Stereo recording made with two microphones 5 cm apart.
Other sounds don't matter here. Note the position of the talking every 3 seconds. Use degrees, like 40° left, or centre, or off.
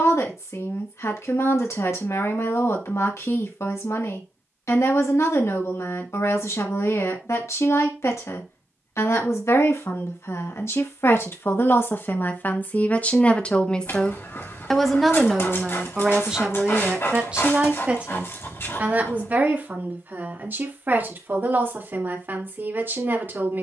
80° left, 80° left, 80° left, 60° left, 30° left, 20° right, 40° right, 40° right.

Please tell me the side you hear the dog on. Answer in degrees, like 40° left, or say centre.
60° left.